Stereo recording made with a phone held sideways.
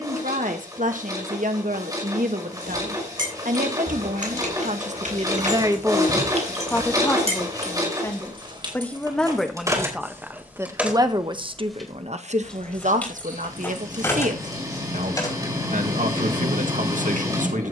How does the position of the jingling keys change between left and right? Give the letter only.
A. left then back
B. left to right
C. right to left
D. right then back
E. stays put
C.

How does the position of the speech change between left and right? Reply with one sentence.
You can hear the speech move from right to left and back again.